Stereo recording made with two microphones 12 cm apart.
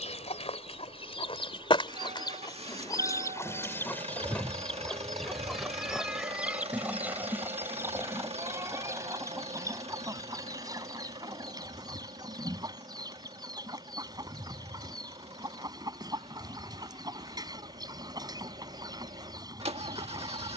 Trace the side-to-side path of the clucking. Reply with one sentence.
In this clip you hear the clucking move to the right.